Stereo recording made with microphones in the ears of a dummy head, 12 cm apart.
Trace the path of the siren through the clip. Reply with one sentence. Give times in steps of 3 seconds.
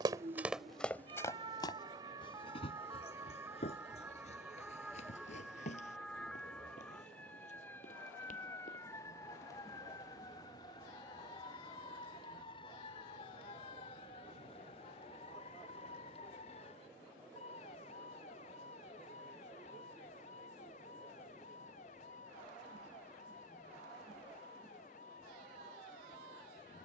In this clip you hear the siren on the right from 0 s, in the centre from 3 s and on the left from 9 s.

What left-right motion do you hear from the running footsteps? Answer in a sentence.
In this clip you hear the running footsteps move to the left.